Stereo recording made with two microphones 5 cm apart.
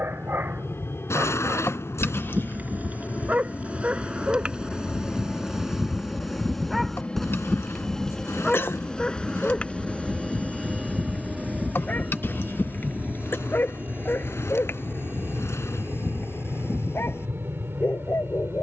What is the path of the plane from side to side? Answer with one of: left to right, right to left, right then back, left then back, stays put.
left to right.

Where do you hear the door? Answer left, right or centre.
left.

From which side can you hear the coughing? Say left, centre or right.
left.